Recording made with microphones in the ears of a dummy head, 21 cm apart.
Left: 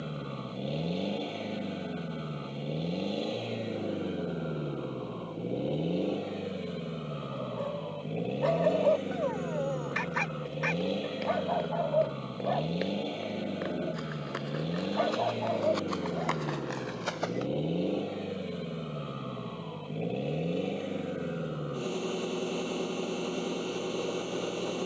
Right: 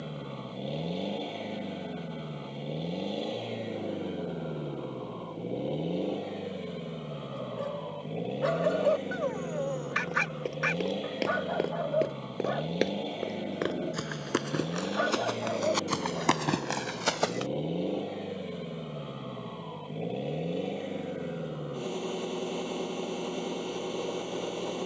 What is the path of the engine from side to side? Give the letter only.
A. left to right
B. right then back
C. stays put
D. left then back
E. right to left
C.